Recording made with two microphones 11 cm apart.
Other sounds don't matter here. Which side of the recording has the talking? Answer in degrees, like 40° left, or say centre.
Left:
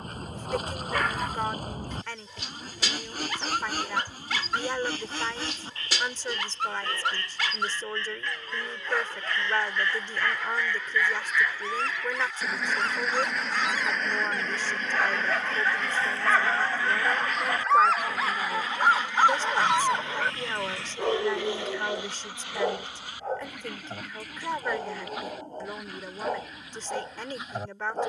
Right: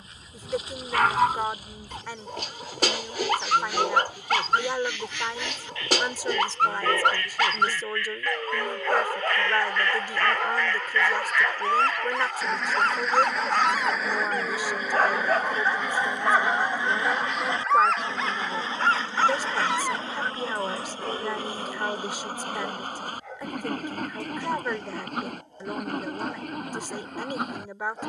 10° right.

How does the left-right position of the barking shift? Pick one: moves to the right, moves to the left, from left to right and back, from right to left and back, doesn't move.
moves to the left.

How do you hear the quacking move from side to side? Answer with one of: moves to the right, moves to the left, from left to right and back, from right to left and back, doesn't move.
moves to the right.